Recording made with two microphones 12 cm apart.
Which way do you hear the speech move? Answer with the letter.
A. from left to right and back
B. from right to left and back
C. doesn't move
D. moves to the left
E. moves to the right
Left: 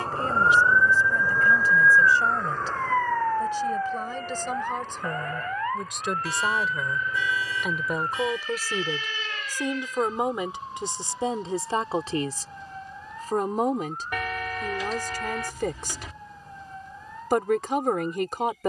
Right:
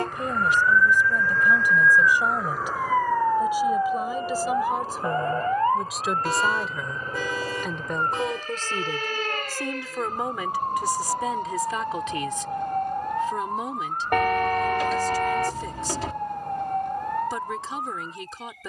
D.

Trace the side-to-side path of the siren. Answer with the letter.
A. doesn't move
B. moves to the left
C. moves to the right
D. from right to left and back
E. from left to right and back
C.